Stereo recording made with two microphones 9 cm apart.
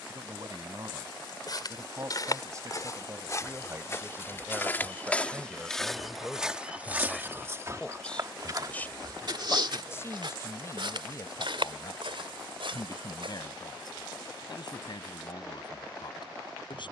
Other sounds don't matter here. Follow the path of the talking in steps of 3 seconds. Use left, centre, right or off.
right, right, centre, left, left, left.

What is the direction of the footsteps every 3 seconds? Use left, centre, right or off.
left, left, right, right, right, off.